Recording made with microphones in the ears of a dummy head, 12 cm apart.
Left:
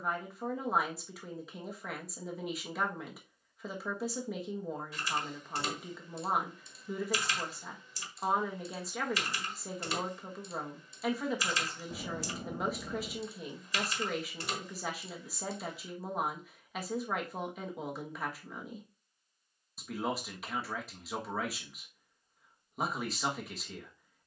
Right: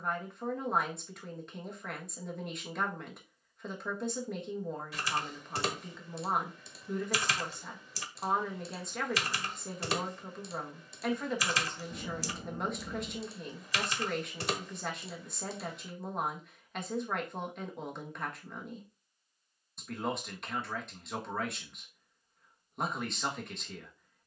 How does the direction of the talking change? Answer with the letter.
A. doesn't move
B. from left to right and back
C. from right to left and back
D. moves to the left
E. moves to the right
A.